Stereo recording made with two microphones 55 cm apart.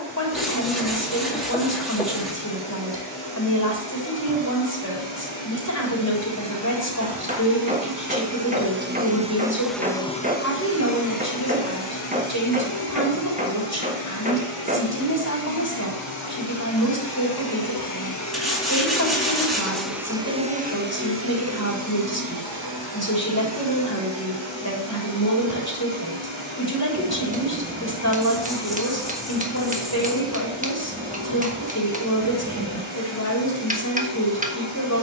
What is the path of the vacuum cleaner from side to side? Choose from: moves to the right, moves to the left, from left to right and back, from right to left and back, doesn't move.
from right to left and back.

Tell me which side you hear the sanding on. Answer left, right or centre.
centre.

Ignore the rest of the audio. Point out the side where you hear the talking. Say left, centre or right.
left.